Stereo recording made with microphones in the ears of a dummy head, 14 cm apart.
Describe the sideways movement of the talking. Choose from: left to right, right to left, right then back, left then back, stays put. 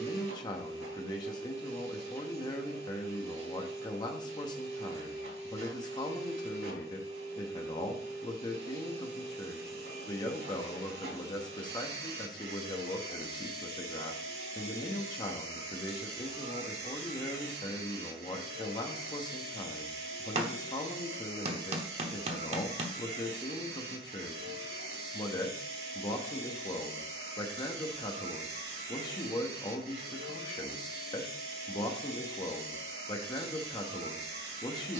stays put.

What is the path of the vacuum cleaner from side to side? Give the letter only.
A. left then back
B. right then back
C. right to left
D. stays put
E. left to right
D.